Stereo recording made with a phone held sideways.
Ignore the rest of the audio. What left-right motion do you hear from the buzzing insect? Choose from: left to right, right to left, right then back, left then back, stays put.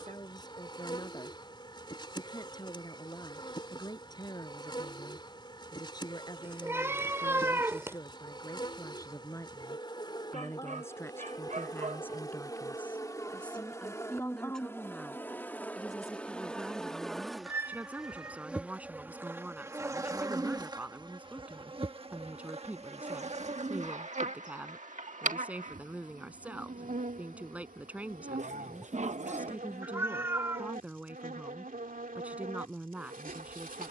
left to right.